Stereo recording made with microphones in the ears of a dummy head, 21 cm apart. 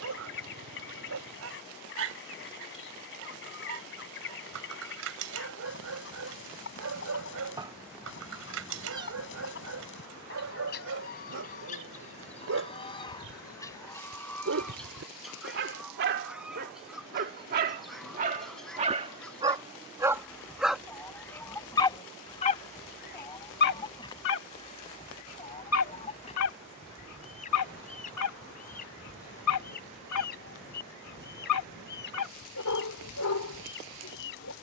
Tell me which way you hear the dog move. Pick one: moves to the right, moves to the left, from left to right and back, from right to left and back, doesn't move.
moves to the left.